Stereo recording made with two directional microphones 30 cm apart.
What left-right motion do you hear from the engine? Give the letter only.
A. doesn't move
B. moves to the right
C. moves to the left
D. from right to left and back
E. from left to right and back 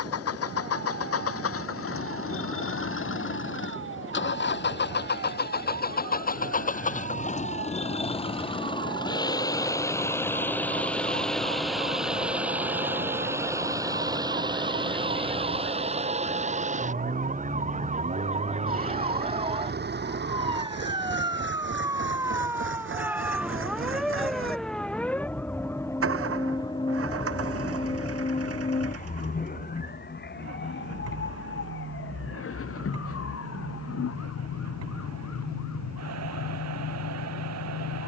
B.